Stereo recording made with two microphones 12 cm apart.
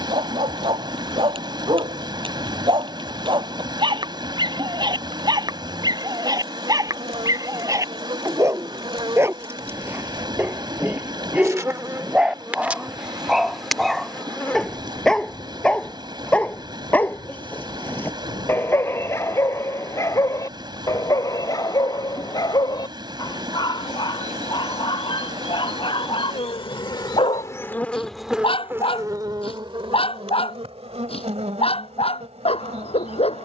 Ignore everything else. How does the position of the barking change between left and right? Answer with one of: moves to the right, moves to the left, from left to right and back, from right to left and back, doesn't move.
moves to the left.